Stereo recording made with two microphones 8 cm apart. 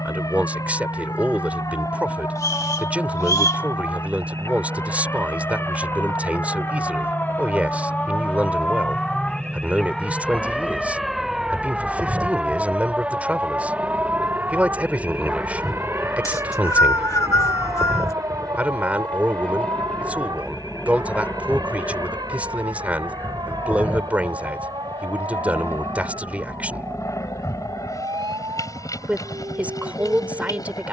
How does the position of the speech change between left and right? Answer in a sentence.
You can hear the speech stay in one place.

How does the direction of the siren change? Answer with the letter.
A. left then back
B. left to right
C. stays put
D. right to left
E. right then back
B.